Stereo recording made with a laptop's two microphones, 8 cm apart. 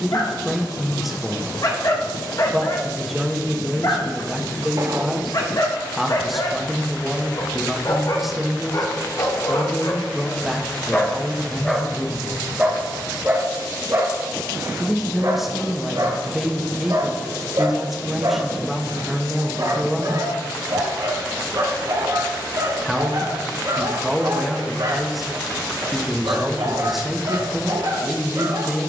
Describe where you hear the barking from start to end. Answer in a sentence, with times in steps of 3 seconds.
In this clip you hear the barking on the left from 0 s and on the right from 12 s.